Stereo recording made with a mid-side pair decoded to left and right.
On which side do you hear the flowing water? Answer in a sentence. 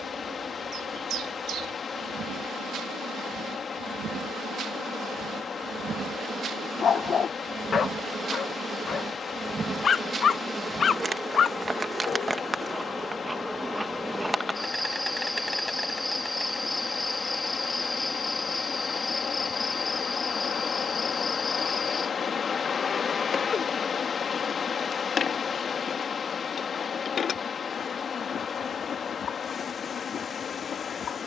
You can hear the flowing water on the left.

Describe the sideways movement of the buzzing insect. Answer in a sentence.
You can hear the buzzing insect go from the right side to the left.